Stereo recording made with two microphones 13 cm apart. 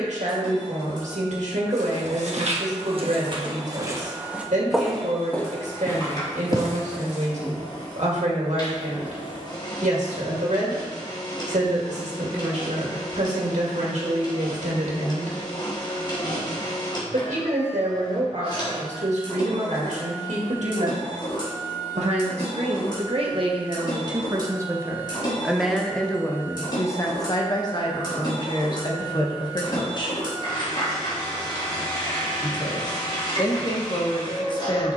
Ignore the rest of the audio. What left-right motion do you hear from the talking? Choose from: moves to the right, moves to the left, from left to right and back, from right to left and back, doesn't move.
moves to the left.